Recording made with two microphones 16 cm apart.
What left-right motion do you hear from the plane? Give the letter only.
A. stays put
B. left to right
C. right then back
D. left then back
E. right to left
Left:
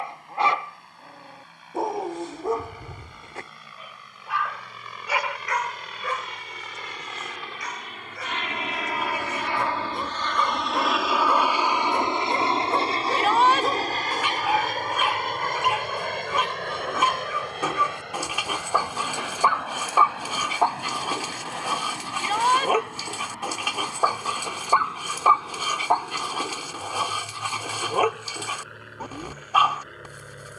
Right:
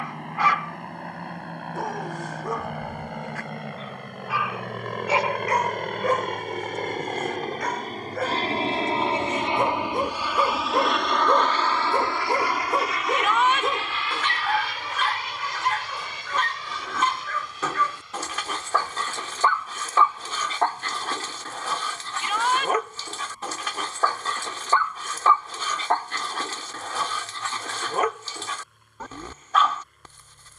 E.